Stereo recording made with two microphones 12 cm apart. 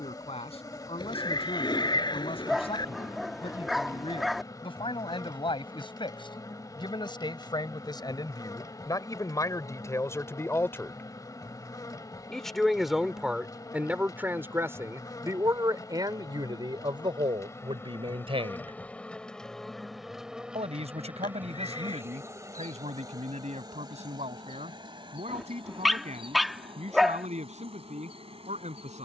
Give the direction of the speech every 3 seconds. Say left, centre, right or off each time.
left, left, left, left, centre, right, right, right, right, right.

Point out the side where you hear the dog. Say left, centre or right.
centre.